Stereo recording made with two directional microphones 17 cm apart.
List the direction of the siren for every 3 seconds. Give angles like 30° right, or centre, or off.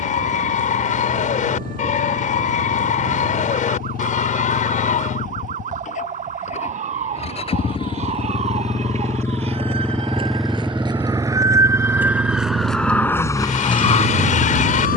50° right, 50° right, 40° right, 30° right, 20° left.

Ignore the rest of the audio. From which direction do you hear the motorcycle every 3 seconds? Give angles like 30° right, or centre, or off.
60° left, 50° left, 30° left, centre, 40° right.